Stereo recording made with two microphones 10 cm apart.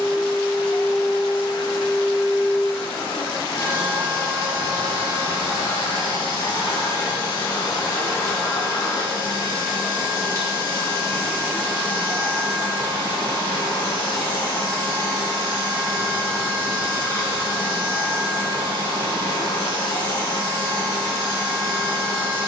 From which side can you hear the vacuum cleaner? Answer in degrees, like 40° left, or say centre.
40° left.